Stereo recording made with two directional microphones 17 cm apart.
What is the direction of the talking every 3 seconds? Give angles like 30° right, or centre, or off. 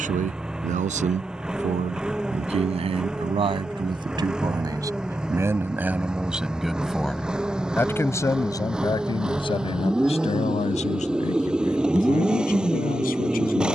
40° right, 20° right, 10° left, 40° left, 60° left.